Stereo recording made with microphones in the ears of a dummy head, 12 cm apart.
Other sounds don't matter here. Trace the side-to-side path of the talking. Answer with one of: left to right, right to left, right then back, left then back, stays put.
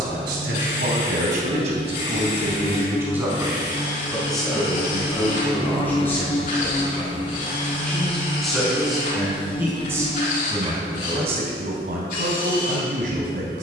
left then back.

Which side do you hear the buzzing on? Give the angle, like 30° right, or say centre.
40° left.